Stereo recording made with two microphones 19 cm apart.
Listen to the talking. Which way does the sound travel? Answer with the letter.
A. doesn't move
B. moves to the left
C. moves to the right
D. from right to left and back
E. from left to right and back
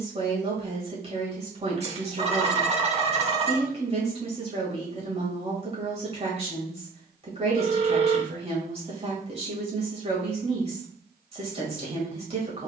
A.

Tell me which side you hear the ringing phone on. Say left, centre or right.
right.